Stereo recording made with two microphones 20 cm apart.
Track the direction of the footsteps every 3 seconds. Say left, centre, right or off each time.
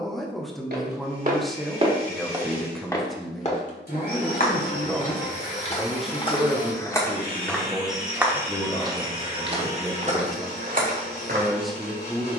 right, left, centre, right.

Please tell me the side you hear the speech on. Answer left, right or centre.
centre.